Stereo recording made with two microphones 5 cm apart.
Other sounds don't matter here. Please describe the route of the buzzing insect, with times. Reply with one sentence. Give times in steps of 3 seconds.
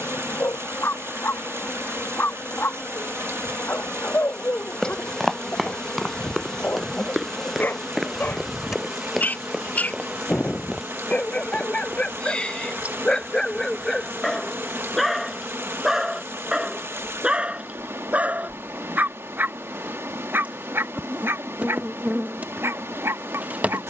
You can hear the buzzing insect on the left from 0 s, in the centre from 6 s and on the right from 9 s.